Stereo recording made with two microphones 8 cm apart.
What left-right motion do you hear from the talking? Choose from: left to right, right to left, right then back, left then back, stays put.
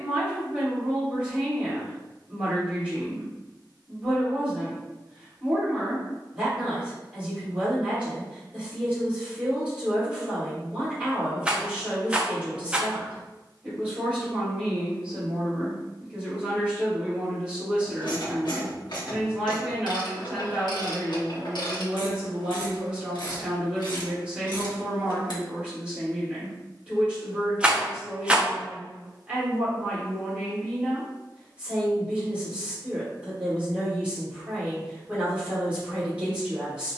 stays put.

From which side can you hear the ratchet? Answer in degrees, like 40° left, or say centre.
70° left.